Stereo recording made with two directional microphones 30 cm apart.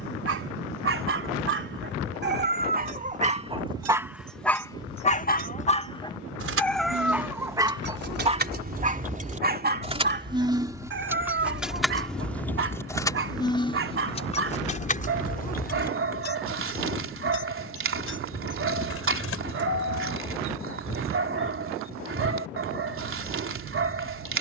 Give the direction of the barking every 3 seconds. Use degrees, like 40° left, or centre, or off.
40° right, centre, 10° right, 40° right, 40° right, 40° right, 40° right, 40° right.